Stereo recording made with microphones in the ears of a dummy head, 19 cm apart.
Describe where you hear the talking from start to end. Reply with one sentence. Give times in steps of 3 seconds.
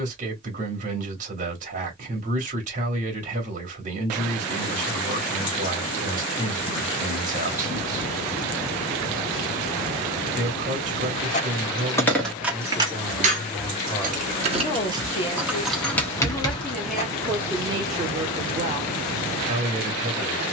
You can hear the talking on the right from 0 s, in the centre from 12 s and on the right from 18 s.